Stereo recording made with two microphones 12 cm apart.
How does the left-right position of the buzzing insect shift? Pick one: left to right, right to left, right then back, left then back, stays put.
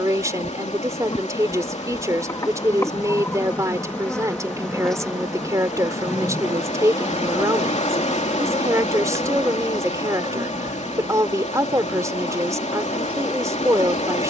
left to right.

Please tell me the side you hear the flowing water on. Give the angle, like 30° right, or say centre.
70° left.